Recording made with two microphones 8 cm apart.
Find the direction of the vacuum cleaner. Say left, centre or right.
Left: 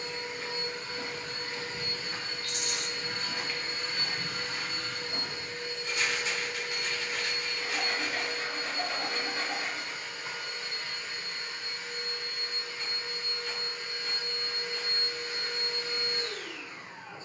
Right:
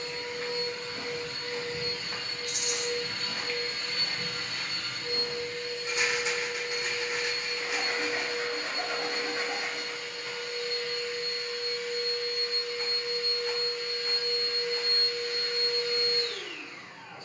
left.